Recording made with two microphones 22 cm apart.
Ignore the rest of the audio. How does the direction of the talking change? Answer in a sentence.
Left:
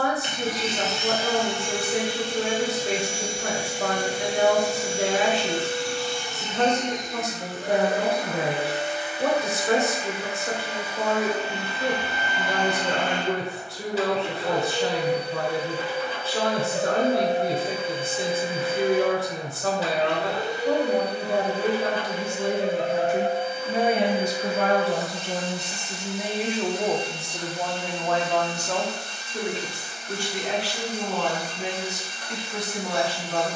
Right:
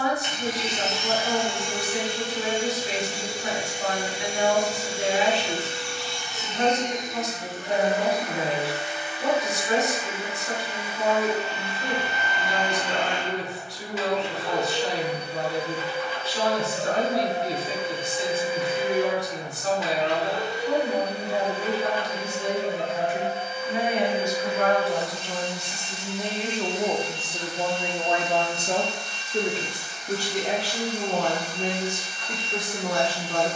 In this clip you hear the talking go from the left side to the right.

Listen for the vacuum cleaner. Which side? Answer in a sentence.
In this clip you hear the vacuum cleaner on the left.